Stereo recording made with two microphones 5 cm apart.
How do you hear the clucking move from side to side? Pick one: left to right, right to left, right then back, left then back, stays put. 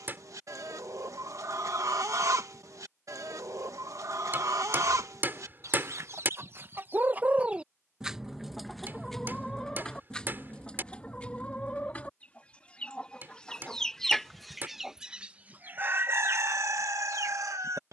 left then back.